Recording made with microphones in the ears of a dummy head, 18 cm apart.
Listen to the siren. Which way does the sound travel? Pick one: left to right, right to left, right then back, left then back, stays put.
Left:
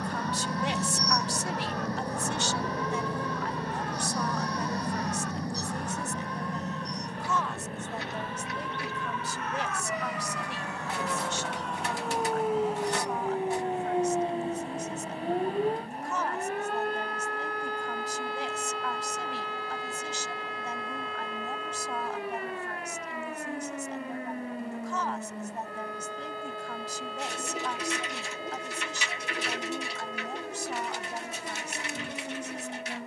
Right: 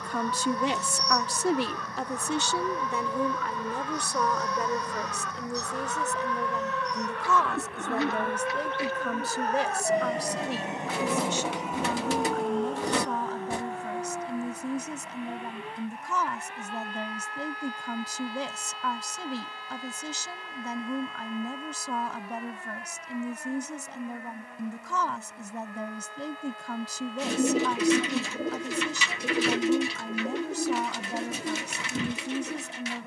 right to left.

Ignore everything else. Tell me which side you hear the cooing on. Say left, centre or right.
right.